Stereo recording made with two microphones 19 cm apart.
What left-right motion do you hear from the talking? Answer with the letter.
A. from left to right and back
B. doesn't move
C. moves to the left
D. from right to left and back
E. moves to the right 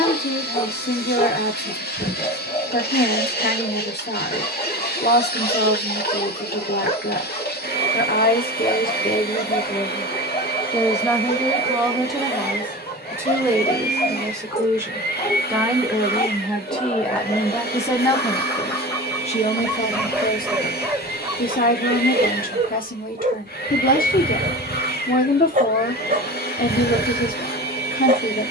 A.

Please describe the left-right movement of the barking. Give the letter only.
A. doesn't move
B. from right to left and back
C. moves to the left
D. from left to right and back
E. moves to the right
E.